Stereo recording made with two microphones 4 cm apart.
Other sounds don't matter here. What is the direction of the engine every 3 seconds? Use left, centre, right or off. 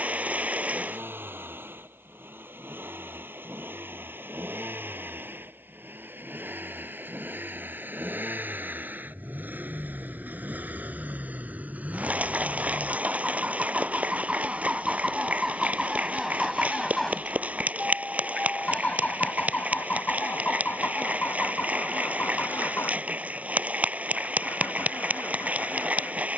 right, right, right, right, right, centre, left, left, left.